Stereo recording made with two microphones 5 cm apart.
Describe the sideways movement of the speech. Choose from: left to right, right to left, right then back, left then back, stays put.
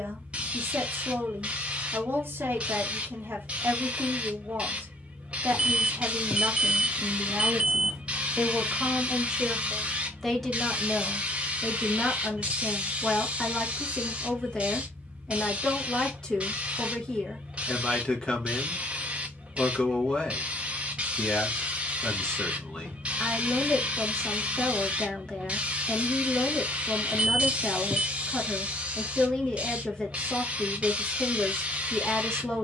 right to left.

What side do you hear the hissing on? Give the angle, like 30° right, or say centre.
30° right.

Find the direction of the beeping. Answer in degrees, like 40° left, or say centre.
10° right.